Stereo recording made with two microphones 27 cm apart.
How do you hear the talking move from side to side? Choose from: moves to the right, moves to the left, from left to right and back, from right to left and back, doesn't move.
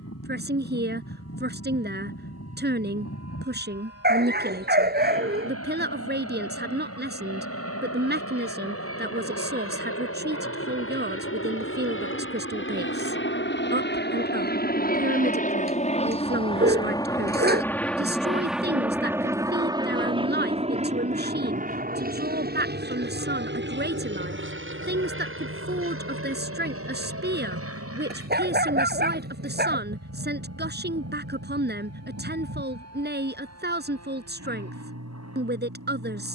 doesn't move.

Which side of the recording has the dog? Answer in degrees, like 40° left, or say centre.
40° right.